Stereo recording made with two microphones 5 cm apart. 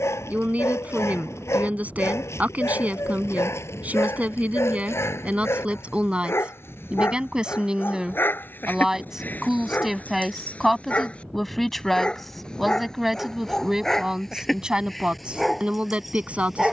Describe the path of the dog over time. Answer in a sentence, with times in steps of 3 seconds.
In this clip you hear the dog on the left from 0 s and in the centre from 12 s.